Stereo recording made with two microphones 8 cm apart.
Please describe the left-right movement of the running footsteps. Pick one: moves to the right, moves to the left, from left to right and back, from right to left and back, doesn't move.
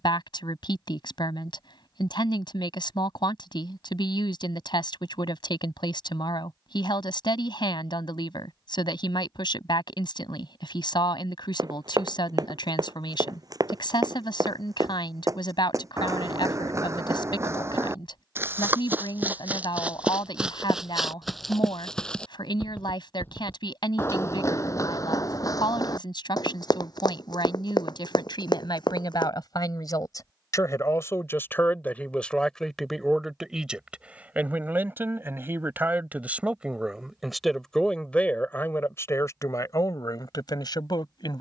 moves to the left.